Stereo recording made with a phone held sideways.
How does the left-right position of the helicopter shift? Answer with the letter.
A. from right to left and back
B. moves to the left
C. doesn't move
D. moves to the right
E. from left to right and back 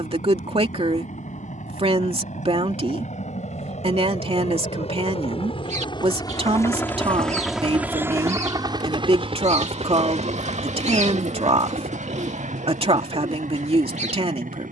D.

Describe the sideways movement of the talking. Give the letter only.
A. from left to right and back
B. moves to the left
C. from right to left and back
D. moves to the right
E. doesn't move
E.